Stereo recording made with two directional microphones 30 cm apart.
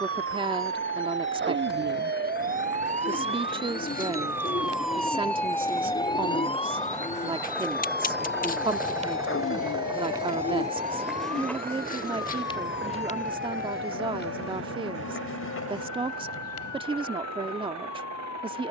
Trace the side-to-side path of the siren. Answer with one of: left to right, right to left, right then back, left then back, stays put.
right to left.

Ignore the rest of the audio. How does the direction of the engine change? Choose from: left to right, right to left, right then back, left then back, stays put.
left to right.